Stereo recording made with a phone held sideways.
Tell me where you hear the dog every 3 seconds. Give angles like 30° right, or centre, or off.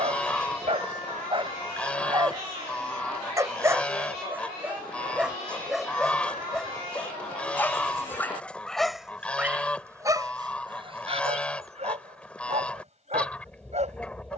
30° right, 10° right, 10° left, 30° right, 40° right.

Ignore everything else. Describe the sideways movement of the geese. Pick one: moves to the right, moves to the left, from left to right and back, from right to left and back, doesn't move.
doesn't move.